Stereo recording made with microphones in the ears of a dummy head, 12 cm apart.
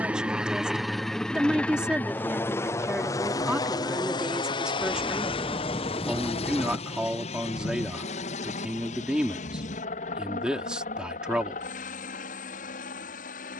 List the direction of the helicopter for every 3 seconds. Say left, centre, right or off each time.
centre, left, left, left, left.